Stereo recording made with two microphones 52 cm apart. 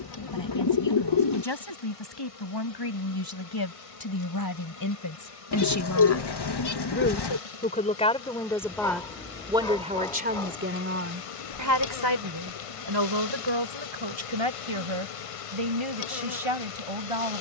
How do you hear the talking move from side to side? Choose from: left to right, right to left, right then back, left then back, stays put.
left to right.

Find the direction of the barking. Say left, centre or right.
centre.